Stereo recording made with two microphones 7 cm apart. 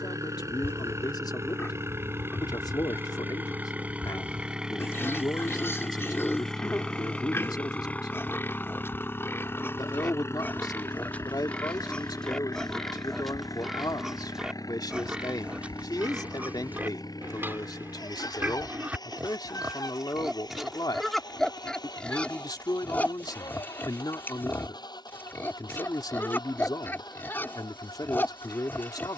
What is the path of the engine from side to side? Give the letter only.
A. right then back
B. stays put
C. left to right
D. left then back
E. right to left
E.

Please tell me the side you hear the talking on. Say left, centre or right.
left.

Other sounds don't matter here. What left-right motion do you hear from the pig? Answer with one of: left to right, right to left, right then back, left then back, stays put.
right then back.